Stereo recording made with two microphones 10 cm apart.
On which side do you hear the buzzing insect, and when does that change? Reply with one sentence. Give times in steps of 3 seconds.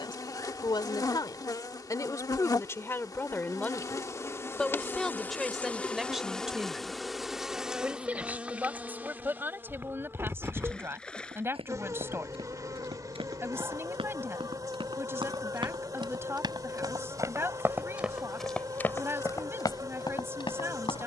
In this clip you hear the buzzing insect on the left from 0 s, in the centre from 6 s and on the right from 9 s.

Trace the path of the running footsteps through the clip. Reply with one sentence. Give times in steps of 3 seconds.
You can hear the running footsteps not at all from 0 s, on the right from 9 s and on the left from 18 s.